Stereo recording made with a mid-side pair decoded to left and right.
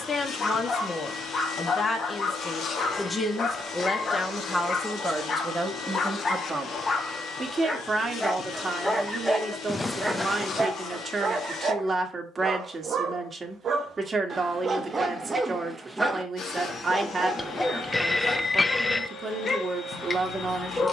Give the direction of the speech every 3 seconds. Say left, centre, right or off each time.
left, centre, right, right, right, right, right.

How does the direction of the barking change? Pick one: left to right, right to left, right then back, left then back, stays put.
right then back.